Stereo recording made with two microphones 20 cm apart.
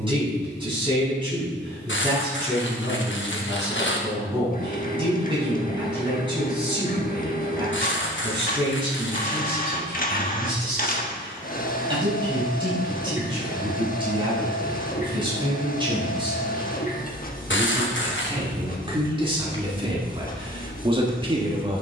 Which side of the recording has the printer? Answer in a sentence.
In this clip you hear the printer on the left.